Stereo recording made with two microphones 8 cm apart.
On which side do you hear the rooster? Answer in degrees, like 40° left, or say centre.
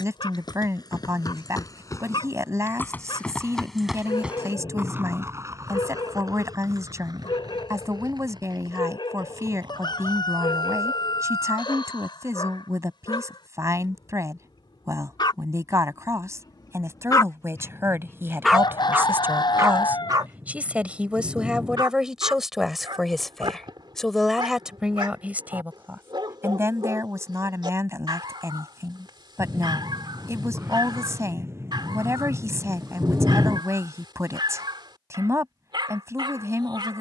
60° left.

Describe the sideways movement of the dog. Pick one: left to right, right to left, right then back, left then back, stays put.
left to right.